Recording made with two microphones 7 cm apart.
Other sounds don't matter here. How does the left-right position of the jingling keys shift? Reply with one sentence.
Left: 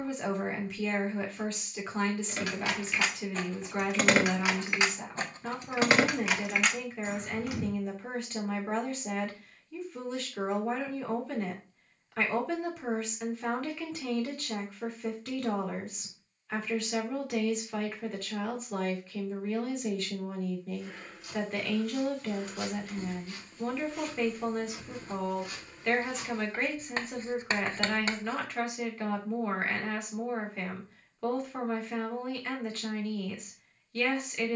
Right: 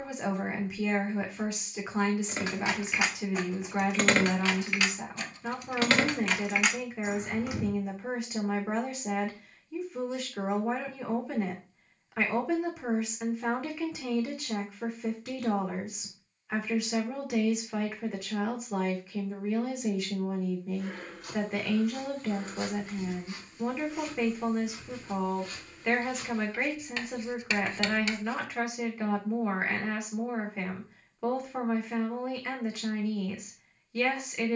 You can hear the jingling keys move from right to left and back again.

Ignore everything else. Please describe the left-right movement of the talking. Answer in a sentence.
In this clip you hear the talking stay put.